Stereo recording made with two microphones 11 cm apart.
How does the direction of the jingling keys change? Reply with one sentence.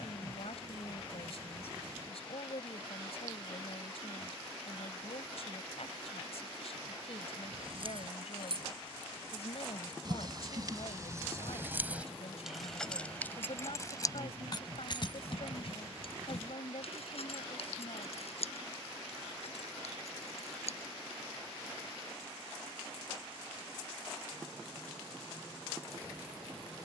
In this clip you hear the jingling keys move to the left.